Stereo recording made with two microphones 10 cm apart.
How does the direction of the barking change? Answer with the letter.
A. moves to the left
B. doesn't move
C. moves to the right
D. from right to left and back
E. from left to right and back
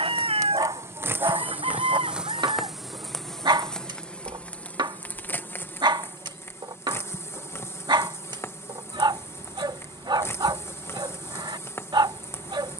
B.